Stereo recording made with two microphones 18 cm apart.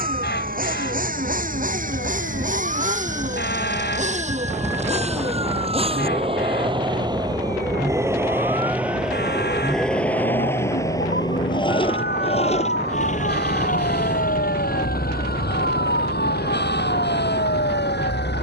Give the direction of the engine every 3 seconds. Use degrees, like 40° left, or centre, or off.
50° right, 40° right, 20° right, 10° left, 50° left, 60° left.